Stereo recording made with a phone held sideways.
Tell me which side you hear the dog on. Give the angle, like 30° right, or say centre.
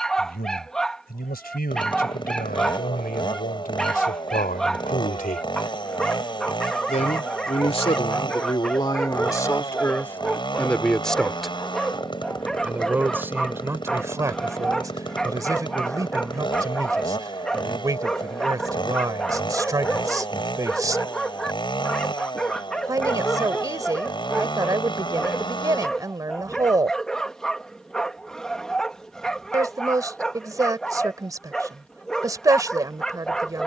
centre.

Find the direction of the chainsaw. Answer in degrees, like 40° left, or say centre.
30° left.